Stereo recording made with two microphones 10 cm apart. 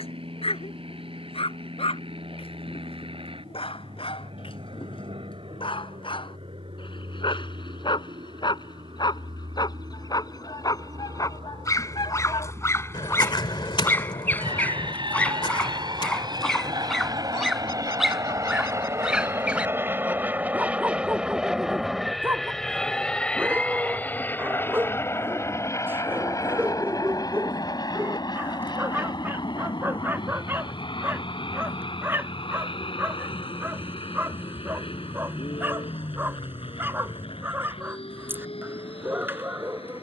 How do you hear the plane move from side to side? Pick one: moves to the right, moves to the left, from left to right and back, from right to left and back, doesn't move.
moves to the left.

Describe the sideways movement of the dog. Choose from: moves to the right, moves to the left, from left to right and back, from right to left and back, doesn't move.
moves to the right.